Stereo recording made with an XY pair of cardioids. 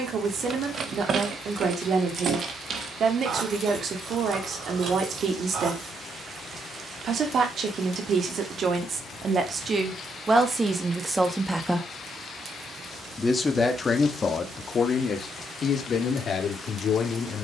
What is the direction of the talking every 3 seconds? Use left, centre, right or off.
right, right, right, right, left, left.